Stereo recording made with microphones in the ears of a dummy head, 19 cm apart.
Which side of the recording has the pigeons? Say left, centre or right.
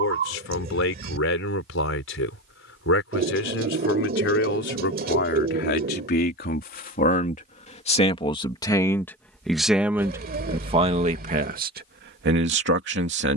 right.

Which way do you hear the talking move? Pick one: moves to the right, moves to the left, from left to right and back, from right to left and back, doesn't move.
moves to the right.